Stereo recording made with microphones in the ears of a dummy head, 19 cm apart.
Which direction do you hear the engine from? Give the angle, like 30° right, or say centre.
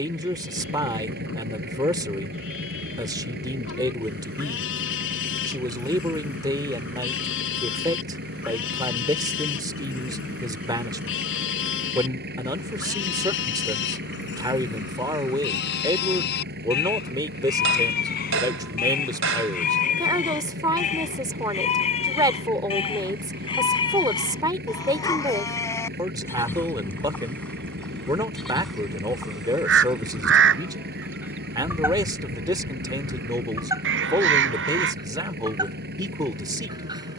50° right.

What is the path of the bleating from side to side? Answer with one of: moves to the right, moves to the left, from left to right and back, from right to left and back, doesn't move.
moves to the right.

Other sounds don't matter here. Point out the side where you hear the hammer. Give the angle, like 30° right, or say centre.
60° right.